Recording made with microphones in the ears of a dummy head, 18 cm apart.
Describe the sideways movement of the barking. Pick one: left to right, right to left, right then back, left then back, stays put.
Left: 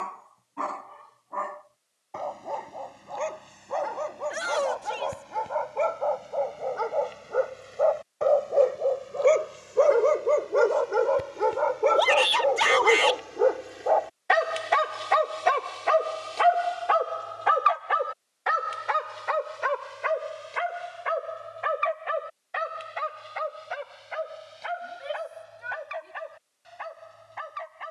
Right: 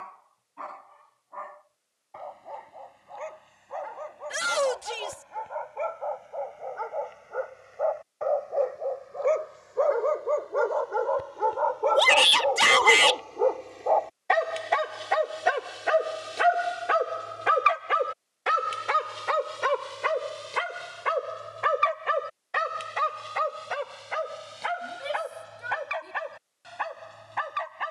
left to right.